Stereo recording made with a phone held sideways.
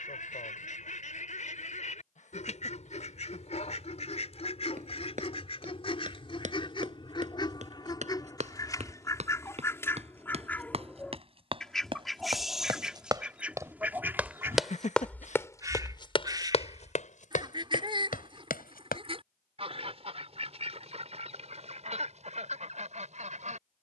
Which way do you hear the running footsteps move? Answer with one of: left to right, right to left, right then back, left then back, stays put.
right to left.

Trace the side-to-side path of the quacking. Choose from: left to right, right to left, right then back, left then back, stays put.
left to right.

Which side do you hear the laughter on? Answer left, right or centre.
left.